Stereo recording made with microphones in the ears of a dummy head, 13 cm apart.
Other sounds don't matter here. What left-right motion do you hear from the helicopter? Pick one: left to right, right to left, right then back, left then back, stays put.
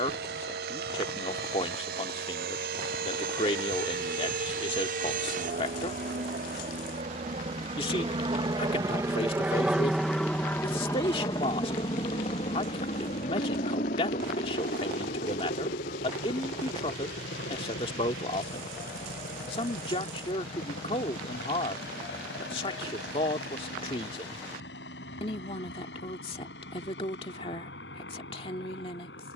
right to left.